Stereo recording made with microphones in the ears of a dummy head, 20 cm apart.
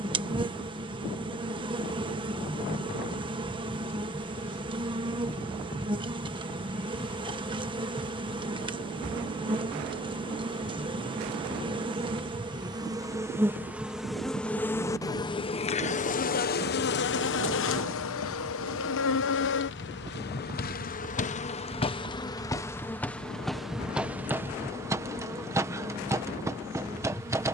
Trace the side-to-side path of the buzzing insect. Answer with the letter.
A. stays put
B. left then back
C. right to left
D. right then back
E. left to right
B.